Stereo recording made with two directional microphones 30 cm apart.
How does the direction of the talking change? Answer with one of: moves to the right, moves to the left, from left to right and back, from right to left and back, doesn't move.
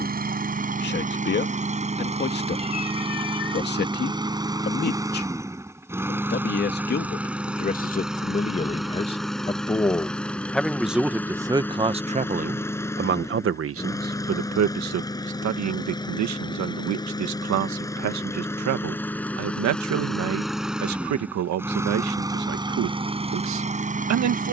moves to the right.